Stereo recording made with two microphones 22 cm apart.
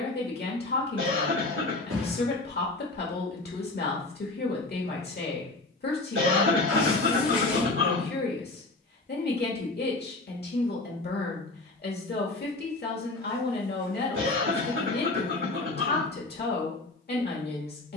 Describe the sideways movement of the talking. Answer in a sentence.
You can hear the talking stay in one place.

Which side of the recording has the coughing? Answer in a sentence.
In this clip you hear the coughing on the right.